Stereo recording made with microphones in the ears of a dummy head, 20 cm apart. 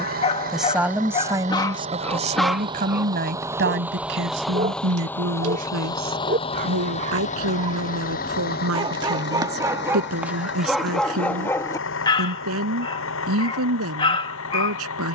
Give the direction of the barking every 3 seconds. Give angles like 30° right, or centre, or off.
20° left, 30° right, 30° right, 10° right, 20° left.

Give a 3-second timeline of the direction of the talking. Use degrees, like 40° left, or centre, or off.
20° right, 70° right, 80° right, 80° right, 80° right.